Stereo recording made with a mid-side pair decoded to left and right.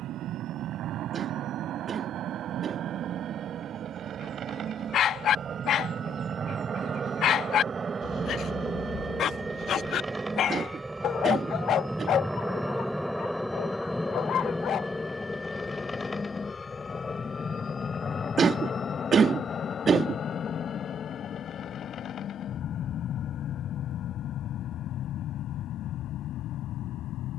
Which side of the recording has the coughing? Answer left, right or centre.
right.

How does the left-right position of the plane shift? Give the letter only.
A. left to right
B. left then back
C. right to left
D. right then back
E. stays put
C.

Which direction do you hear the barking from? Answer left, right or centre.
left.